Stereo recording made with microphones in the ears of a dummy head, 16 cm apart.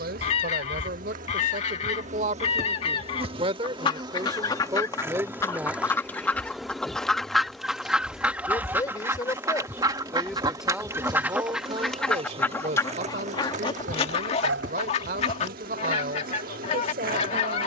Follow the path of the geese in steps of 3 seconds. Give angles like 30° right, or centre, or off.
30° left, 20° left, centre, 10° right, 20° left, 40° left.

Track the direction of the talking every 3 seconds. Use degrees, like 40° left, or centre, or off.
50° right, 20° right, 20° left, centre, 50° right, 50° right.